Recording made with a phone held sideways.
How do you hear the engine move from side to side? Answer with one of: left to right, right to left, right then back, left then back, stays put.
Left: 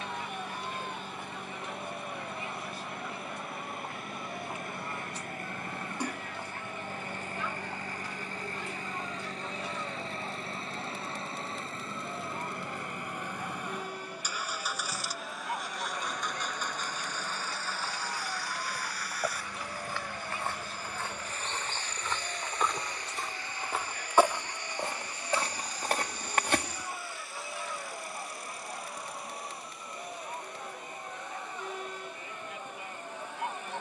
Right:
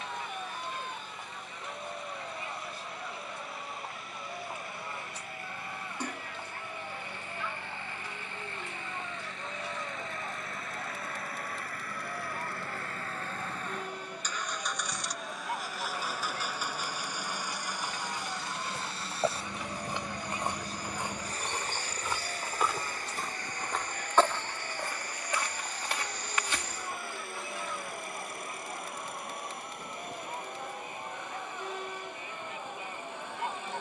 left to right.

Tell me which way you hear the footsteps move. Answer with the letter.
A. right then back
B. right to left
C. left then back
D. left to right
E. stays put
B.